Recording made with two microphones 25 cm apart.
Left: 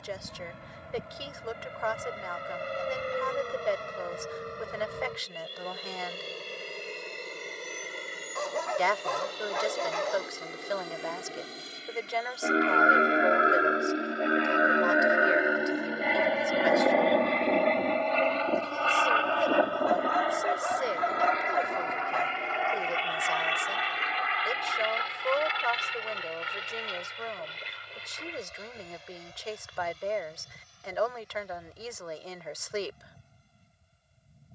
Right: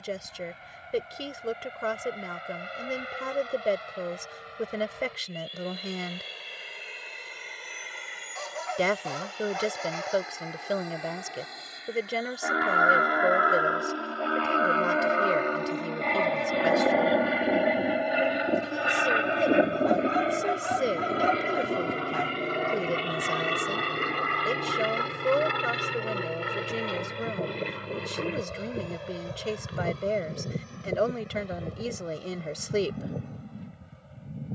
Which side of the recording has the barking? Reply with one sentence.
In this clip you hear the barking on the left.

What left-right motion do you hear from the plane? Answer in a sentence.
In this clip you hear the plane travel towards the right.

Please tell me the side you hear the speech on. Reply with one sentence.
You can hear the speech on the right.